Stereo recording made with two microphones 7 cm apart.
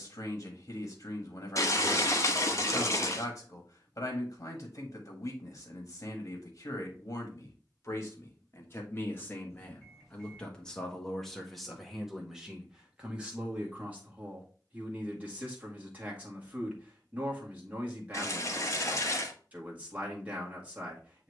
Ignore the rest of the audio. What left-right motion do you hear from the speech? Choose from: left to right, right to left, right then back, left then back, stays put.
left to right.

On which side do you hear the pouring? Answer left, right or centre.
left.